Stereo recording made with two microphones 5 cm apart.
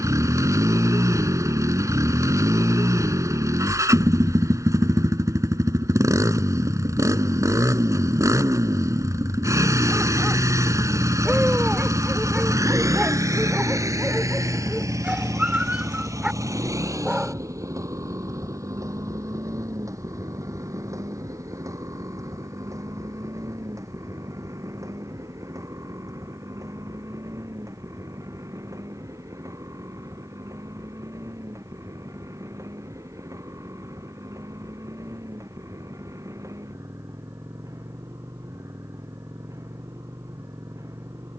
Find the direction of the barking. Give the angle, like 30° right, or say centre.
20° right.